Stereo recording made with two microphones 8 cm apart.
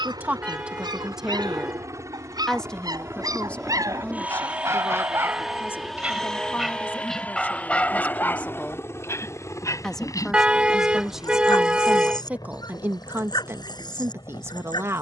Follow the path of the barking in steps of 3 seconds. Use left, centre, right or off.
right, right, centre, left, left.